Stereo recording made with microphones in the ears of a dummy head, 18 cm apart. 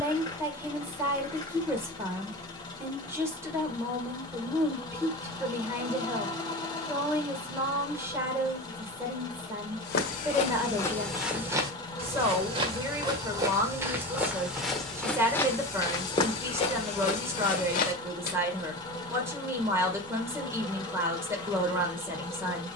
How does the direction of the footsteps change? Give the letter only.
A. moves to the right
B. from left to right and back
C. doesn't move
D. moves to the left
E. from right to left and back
B.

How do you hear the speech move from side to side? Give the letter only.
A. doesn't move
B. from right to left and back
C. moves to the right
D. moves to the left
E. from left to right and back
A.